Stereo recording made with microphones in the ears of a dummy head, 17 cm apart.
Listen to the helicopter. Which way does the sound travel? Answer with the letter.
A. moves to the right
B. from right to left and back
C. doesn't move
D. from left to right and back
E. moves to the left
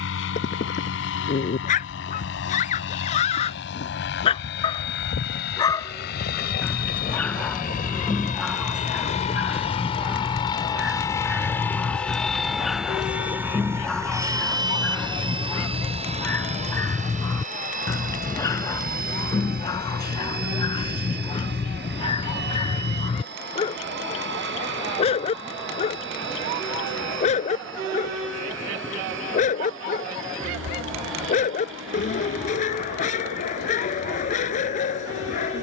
A.